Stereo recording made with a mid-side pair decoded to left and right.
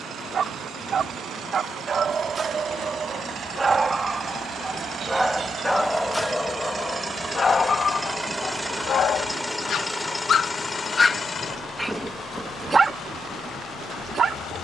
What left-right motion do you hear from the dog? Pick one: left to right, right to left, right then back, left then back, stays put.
left then back.